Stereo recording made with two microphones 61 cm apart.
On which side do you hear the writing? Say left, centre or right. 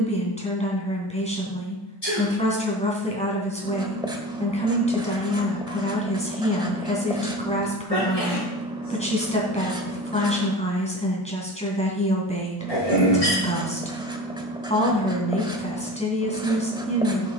centre.